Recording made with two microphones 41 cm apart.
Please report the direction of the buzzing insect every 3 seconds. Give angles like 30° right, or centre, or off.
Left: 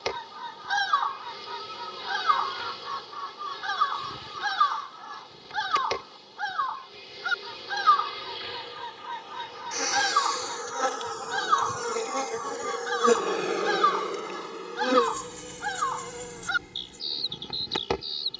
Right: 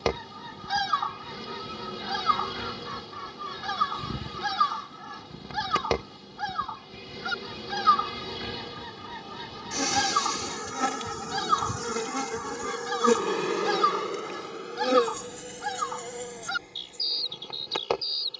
70° right, 70° right, 60° right, 40° right, 10° right, 20° left.